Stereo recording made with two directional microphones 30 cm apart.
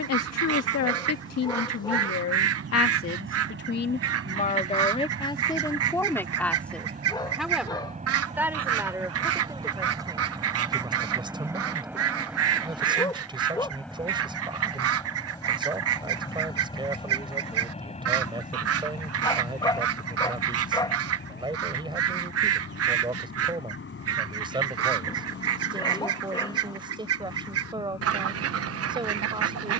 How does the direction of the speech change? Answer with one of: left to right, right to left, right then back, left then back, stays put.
left to right.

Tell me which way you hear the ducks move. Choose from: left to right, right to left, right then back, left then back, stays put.
stays put.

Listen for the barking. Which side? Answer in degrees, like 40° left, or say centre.
10° left.